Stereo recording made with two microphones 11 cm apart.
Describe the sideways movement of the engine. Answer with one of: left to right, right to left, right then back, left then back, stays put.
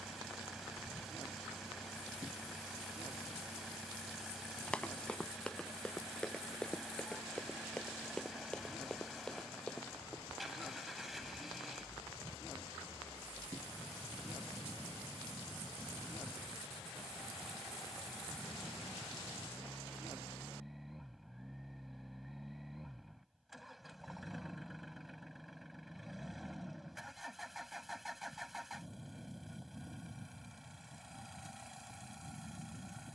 stays put.